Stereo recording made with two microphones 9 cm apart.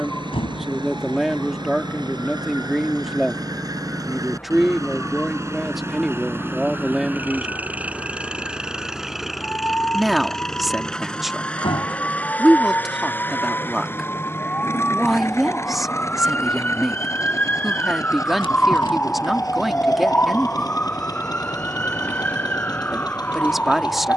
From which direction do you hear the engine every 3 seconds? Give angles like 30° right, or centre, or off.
60° right, 40° right, 20° right, centre, 20° left, 30° left, 40° left, 50° left.